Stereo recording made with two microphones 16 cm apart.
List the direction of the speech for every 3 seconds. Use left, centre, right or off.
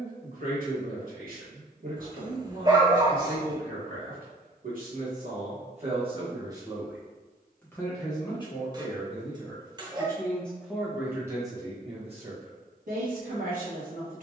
right, right, centre, centre, right.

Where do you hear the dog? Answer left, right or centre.
right.